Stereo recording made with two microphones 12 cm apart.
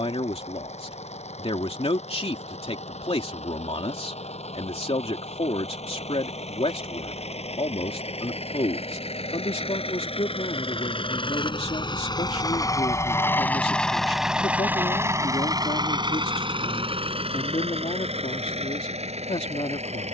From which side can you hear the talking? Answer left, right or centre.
left.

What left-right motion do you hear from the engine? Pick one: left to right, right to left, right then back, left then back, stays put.
left to right.